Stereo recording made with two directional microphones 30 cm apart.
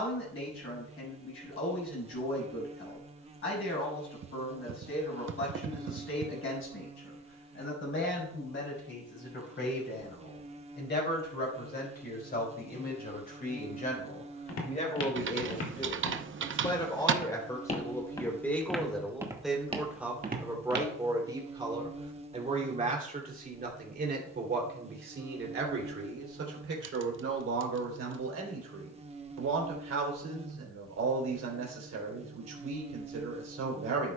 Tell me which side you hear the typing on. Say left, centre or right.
right.